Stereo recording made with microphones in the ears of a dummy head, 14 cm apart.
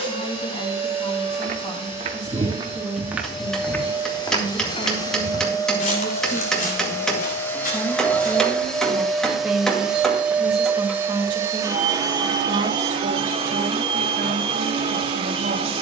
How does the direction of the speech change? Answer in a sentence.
In this clip you hear the speech travel towards the right.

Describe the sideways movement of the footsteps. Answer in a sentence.
You can hear the footsteps go from the right side to the left.